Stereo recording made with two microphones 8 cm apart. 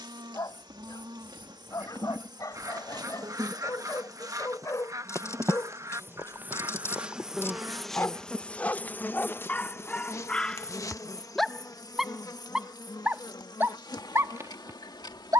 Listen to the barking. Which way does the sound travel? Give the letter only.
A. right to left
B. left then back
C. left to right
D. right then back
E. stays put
C.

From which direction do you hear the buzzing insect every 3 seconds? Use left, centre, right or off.
right, right, centre, left, left.